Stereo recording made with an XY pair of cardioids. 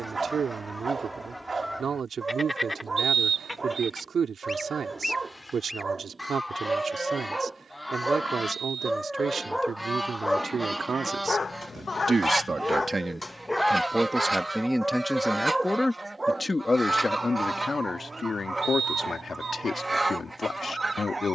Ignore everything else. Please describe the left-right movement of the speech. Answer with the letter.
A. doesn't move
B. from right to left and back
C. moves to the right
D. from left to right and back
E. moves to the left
E.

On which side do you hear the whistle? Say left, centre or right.
right.